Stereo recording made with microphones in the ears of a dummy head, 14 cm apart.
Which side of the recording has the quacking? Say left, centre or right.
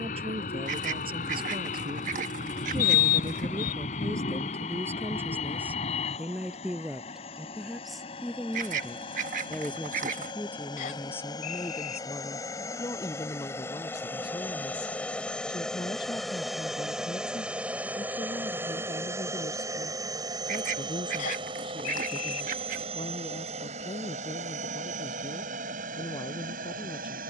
right.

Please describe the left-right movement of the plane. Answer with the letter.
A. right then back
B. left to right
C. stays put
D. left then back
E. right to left
B.